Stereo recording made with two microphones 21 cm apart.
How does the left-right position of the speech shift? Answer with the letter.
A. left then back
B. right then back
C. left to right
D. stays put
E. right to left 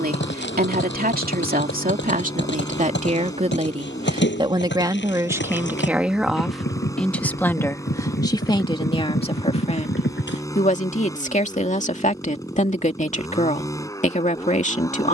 E.